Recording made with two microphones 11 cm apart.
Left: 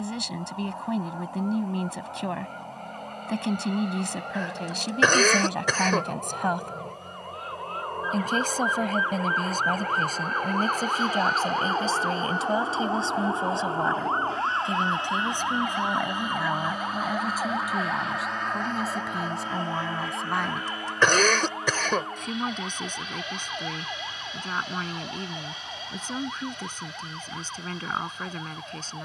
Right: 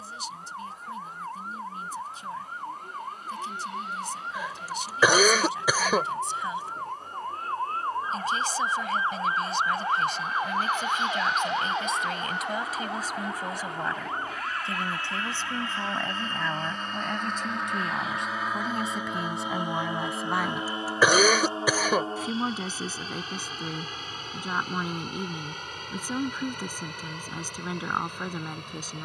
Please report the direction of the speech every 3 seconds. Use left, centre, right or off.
left, left, left, left, left, centre, centre, centre, centre, centre.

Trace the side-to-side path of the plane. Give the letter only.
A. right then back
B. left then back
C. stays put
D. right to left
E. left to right
E.